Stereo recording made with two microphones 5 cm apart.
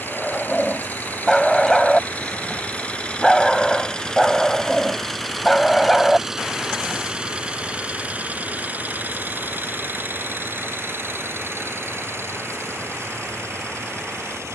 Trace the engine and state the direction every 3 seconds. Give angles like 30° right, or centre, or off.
30° left, 10° left, 20° right, 50° right, 60° right.